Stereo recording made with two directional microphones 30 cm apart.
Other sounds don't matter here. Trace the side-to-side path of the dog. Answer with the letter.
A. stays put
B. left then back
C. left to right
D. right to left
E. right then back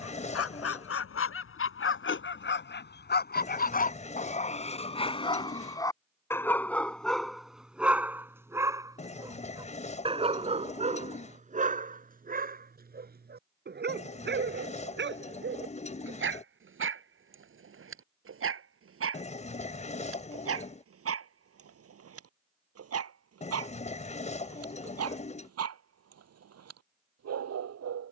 C.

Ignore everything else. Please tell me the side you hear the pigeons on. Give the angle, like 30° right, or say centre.
20° left.